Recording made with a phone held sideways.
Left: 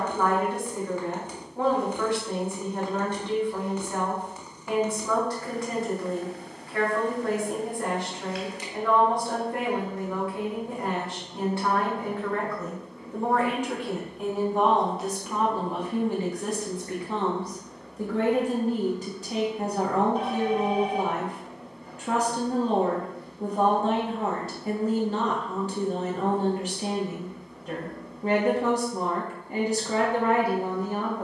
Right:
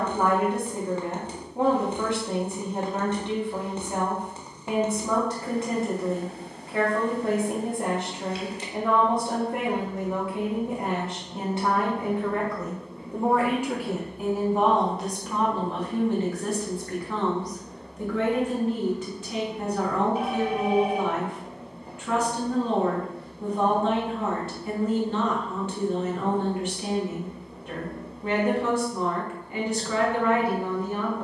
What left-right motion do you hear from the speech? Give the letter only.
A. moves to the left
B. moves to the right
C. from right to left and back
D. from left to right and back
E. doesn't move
A.